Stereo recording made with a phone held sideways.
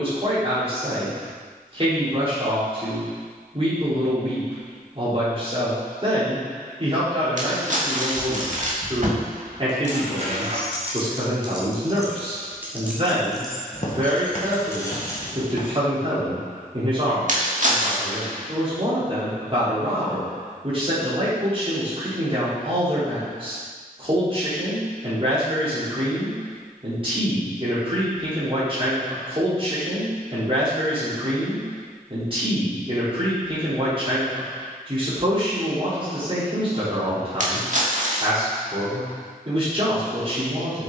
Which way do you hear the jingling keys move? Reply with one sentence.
You can hear the jingling keys move to the left.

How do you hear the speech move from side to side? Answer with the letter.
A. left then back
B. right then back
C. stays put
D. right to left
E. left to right
C.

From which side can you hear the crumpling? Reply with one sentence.
In this clip you hear the crumpling on the right.